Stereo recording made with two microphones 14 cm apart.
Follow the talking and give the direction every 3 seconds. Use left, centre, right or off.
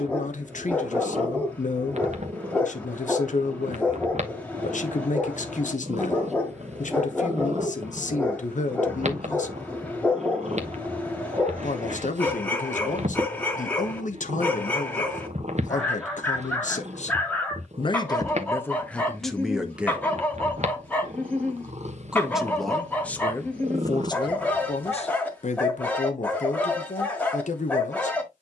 left, left, left, left, left, left, centre, centre, left, left.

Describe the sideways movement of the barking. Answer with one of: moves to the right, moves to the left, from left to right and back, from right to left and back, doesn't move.
doesn't move.